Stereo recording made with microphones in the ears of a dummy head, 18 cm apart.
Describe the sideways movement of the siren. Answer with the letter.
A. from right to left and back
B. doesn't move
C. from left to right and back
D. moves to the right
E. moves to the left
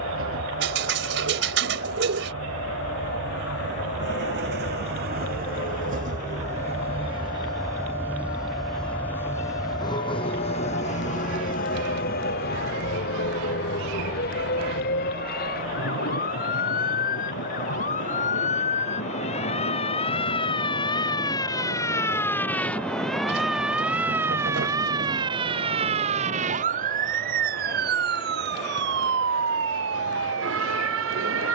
D.